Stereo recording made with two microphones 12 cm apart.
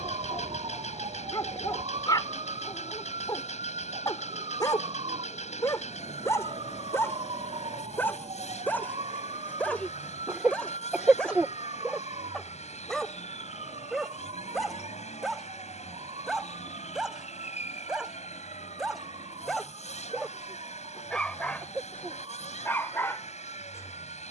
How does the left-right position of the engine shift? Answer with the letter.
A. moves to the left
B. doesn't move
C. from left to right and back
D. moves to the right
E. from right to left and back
B.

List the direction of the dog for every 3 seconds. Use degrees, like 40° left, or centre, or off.
40° left, 30° left, 20° left, 10° left, centre, centre, centre, 20° left.